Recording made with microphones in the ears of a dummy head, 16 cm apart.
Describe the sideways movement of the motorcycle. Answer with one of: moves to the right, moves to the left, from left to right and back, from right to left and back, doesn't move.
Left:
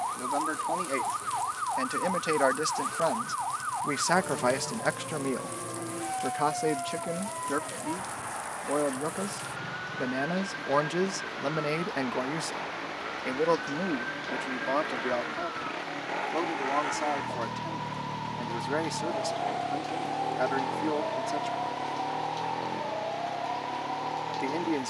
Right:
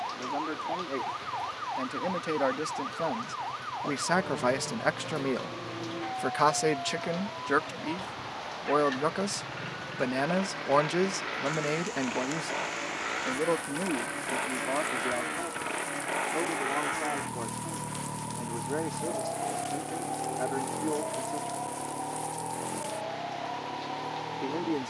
moves to the left.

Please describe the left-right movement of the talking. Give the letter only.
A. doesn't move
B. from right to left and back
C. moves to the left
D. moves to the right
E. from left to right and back
E.